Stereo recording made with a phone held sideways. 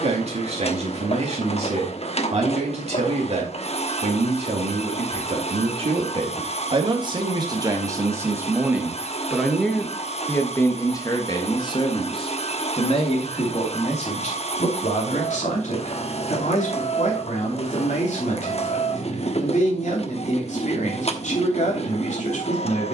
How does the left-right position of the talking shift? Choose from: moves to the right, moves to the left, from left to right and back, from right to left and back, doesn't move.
moves to the left.